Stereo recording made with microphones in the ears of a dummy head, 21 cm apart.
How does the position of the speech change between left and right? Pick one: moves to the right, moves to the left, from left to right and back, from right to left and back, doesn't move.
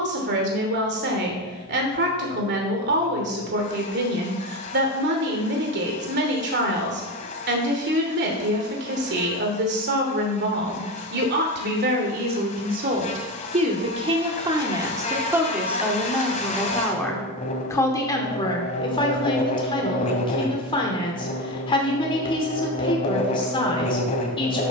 moves to the left.